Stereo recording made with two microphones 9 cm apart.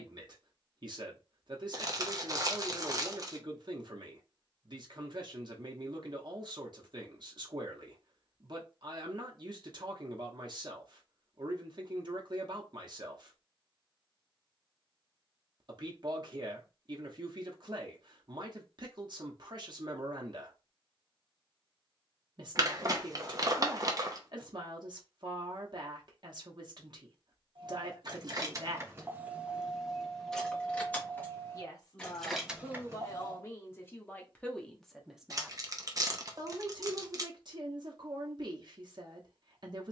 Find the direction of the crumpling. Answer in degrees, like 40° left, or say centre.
40° right.